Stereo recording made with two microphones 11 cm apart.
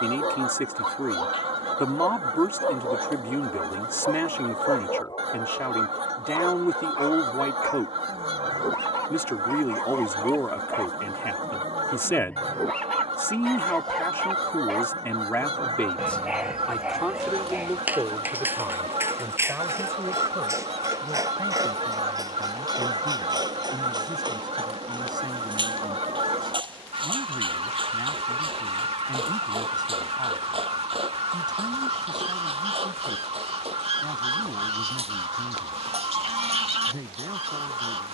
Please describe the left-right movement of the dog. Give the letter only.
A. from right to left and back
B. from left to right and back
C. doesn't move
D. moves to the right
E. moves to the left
D.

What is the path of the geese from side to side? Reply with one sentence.
In this clip you hear the geese stay in one place.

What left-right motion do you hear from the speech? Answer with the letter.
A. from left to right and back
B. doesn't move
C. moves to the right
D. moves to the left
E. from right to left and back
C.